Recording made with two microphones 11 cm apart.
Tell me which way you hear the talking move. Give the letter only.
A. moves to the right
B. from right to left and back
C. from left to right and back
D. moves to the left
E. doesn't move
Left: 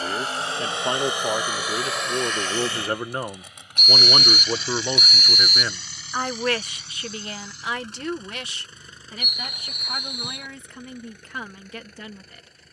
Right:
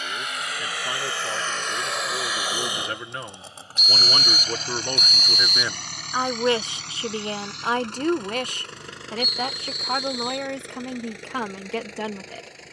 A.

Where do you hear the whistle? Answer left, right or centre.
left.